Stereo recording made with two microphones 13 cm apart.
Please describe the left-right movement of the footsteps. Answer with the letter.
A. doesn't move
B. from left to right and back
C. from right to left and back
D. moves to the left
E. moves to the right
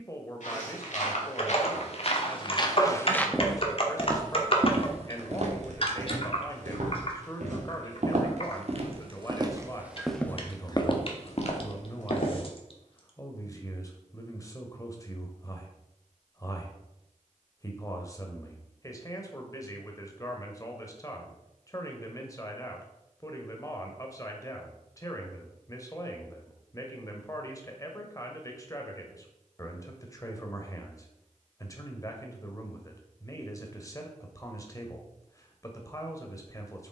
B.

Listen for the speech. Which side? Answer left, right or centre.
left.